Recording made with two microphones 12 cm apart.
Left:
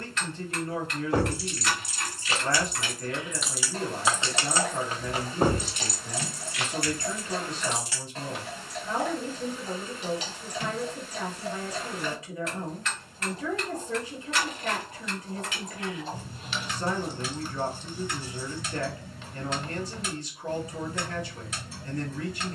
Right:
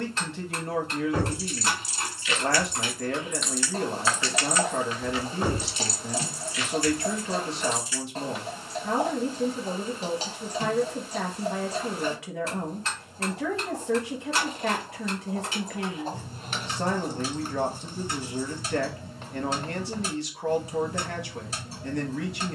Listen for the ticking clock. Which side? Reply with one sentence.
You can hear the ticking clock on the right.